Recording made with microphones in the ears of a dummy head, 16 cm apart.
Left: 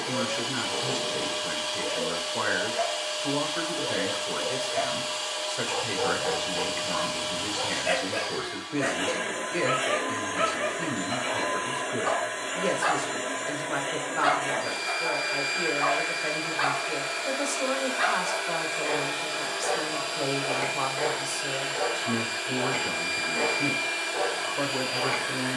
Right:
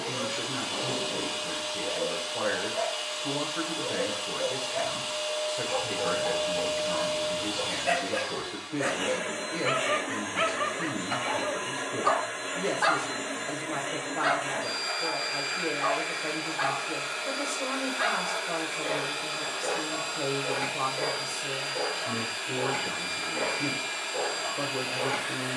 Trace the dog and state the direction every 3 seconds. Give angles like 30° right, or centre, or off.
20° left, 20° left, 10° left, 30° right, 10° right, 20° left, 20° left, 20° left, 20° left.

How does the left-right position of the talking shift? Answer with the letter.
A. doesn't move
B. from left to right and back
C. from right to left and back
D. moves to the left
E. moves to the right
A.